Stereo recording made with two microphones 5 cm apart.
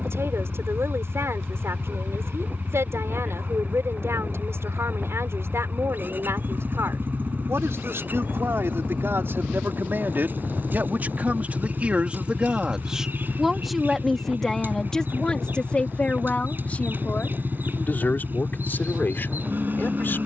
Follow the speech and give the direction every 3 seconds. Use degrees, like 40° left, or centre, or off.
70° right, 70° right, 60° right, 40° right, centre, 30° left, 50° left.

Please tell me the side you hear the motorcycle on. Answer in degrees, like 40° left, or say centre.
40° right.